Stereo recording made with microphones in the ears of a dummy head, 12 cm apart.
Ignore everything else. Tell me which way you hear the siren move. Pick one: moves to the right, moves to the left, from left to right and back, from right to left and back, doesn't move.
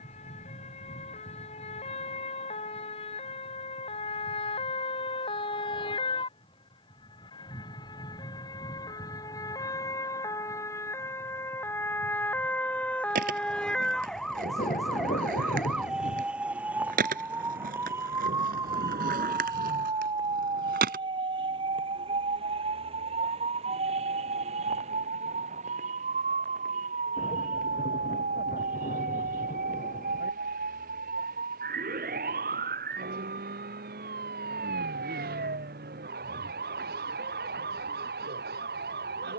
moves to the right.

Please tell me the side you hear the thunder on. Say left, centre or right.
left.